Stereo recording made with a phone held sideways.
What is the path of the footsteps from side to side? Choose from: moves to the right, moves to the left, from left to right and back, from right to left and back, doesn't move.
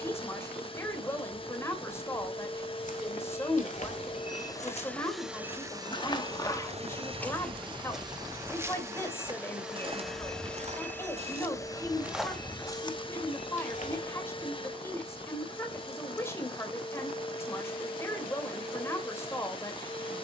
from left to right and back.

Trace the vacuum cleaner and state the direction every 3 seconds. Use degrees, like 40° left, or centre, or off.
40° left, 10° left, 30° right, 10° left, 30° left, 30° left, 30° left.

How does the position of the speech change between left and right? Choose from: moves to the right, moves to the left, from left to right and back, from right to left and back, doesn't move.
doesn't move.